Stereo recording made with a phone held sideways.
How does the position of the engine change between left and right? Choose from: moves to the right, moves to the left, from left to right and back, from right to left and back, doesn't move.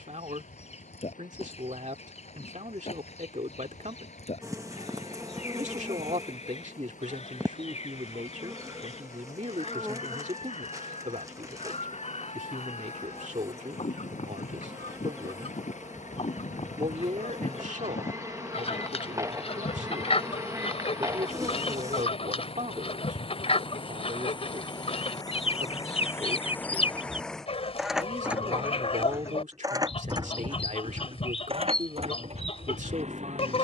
moves to the right.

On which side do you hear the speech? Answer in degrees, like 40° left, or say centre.
60° right.